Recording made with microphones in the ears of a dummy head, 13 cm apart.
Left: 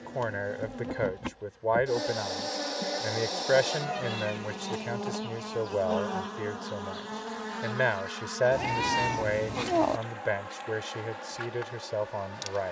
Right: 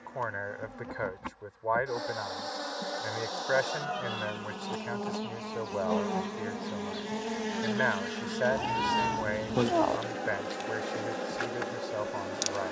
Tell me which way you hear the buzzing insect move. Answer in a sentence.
You can hear the buzzing insect go from the left side to the right.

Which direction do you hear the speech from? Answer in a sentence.
You can hear the speech on the left.